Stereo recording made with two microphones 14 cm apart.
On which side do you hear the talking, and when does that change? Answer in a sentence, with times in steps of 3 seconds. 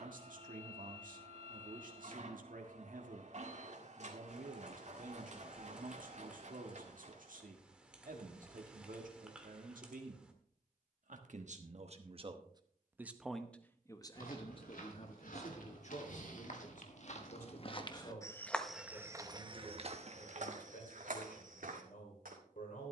You can hear the talking on the right from 0 s, in the centre from 12 s and on the left from 15 s.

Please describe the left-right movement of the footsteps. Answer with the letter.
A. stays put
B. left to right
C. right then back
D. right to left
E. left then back
B.